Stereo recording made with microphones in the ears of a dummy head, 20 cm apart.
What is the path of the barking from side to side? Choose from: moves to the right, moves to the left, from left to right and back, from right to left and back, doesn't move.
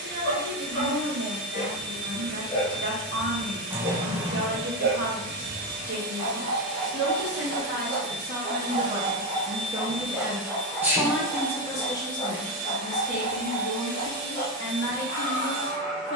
from left to right and back.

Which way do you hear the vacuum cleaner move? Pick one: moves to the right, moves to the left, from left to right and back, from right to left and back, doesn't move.
doesn't move.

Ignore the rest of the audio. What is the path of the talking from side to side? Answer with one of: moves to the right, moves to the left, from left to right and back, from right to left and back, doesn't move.
moves to the left.